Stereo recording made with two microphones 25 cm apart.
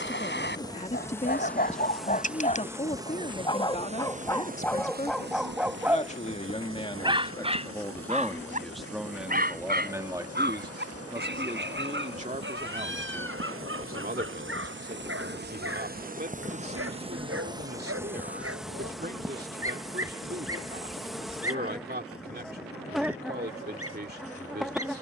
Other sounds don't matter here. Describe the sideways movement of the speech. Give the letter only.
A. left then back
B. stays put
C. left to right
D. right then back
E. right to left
C.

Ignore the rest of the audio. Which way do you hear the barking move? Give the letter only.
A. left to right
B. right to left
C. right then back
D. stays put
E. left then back
A.